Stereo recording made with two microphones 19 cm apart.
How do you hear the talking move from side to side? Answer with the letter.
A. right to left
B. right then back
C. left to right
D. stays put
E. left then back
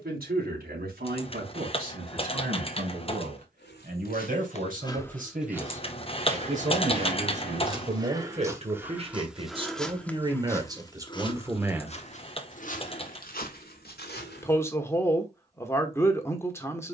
A.